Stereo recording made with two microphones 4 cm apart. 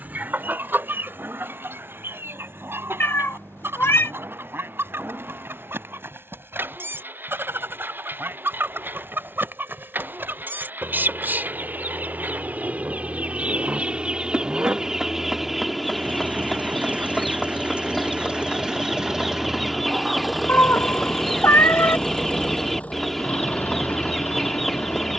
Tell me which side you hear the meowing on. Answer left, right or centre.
left.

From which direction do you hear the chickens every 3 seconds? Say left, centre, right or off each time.
right, right, right, right, right, centre, centre, centre, centre.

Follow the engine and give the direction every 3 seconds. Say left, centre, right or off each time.
right, right, right, right, right, right, centre, left, left.